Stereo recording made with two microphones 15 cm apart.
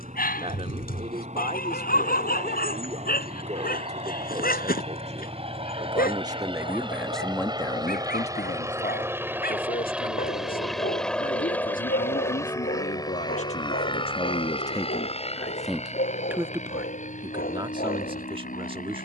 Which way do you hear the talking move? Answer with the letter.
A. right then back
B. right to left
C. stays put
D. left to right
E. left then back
E.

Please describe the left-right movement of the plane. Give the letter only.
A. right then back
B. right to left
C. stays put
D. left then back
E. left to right
B.